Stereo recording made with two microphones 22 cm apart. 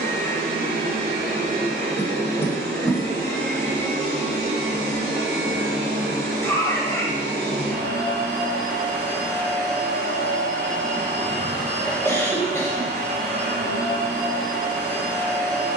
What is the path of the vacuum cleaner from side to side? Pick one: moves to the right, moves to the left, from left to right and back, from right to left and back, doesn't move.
doesn't move.